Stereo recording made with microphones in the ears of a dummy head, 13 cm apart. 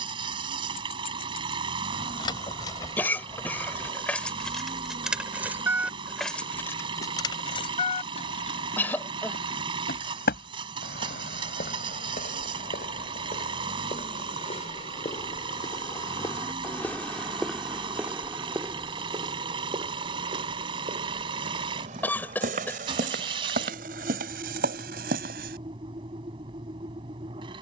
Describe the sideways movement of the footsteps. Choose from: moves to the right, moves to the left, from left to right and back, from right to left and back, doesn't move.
moves to the right.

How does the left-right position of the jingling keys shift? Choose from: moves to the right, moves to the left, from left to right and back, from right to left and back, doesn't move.
from left to right and back.